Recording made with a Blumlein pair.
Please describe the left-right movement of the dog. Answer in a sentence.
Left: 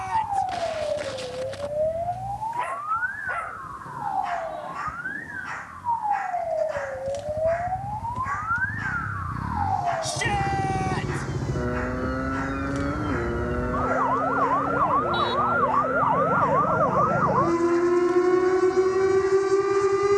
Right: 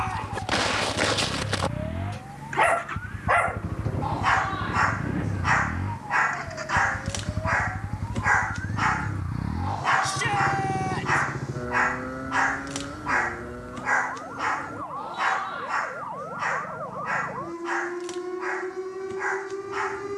You can hear the dog stay put.